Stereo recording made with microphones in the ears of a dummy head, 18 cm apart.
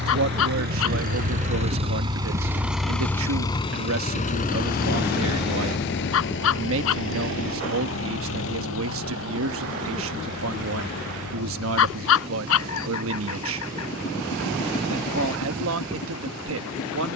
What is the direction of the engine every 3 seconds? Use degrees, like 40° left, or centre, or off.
30° right, 40° left, 70° left, 80° left, 80° left, 80° left.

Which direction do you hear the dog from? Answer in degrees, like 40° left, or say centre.
70° left.